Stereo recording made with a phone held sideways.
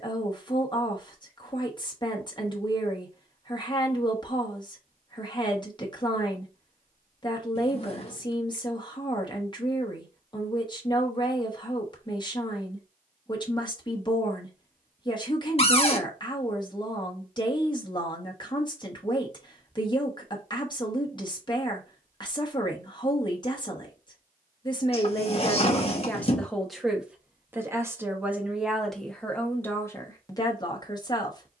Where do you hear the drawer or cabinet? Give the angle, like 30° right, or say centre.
40° left.